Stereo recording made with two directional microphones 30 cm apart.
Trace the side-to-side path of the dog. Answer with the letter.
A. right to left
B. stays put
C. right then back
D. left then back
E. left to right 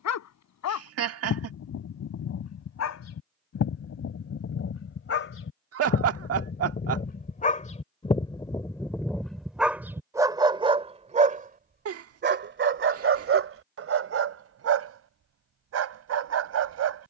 E.